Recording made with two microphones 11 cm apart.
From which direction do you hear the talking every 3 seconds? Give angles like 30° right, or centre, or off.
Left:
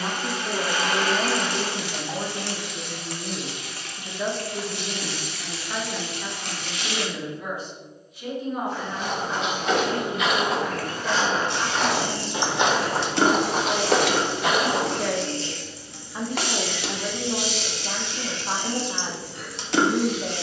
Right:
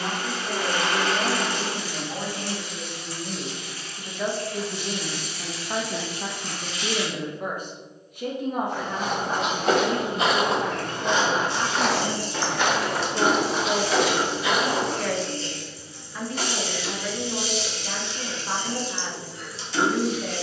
30° left, 10° right, 50° right, 70° right, 30° right, 20° left, 20° left.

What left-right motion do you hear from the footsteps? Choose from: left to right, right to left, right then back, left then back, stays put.
right to left.